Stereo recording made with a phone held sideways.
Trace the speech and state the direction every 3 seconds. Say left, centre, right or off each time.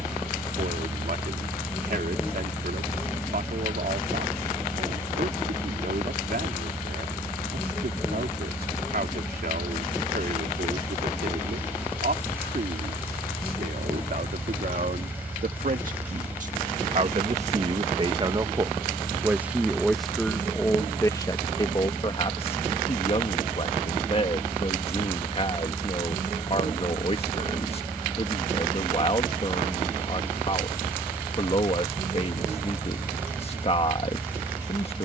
right, right, right, right, right, right, centre, left, left, left, left, left.